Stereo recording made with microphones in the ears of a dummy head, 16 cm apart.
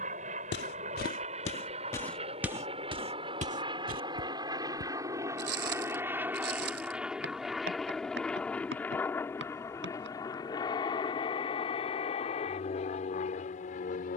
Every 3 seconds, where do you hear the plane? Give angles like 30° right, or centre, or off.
40° right, 20° right, centre, 20° left, 40° left.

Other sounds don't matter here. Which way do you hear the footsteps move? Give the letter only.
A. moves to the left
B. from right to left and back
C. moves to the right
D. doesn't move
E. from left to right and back
C.